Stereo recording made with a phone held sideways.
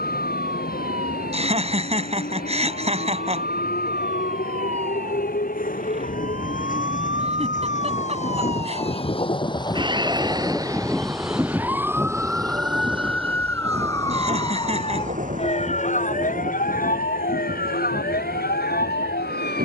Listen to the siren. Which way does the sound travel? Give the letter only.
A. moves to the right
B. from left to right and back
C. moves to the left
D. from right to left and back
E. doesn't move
C.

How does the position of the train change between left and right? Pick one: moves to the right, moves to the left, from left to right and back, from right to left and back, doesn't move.
moves to the right.